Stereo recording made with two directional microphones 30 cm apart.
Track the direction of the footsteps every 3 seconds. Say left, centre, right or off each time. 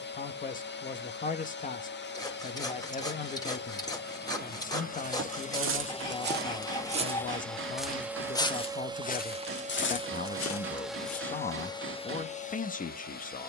off, right, centre, left, off.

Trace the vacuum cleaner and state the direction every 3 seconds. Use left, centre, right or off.
left, left, centre, centre, left.